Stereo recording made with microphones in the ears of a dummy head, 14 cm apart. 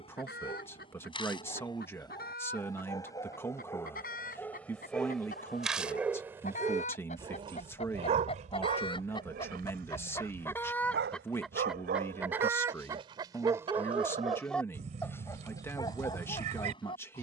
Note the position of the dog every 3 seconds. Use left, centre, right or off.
left, centre, right, right, right, left.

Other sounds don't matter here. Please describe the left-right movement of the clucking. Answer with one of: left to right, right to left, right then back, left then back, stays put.
left to right.